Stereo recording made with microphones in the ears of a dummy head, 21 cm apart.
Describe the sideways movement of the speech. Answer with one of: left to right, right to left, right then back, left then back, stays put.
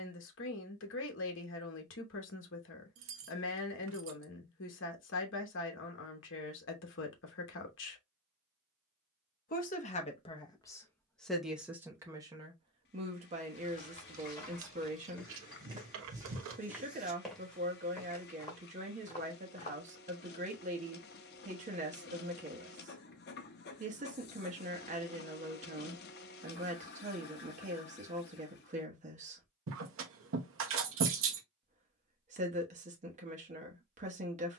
left to right.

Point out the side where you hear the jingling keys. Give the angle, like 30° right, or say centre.
60° right.